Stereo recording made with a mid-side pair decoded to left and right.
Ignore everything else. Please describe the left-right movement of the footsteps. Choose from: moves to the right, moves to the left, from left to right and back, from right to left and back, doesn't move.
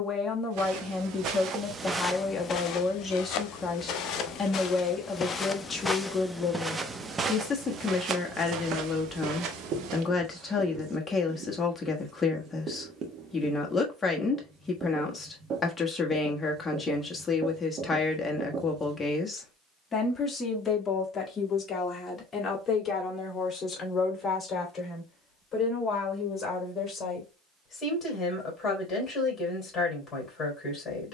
from right to left and back.